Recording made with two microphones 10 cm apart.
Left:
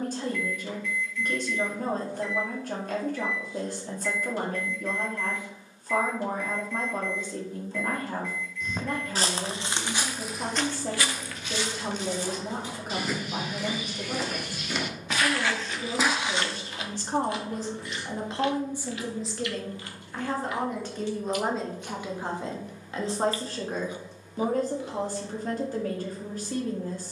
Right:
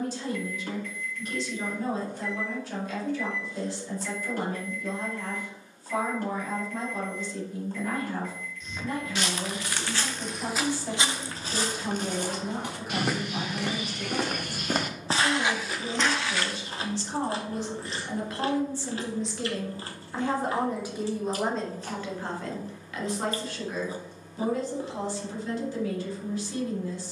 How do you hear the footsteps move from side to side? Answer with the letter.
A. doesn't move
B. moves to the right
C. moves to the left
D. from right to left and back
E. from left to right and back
E.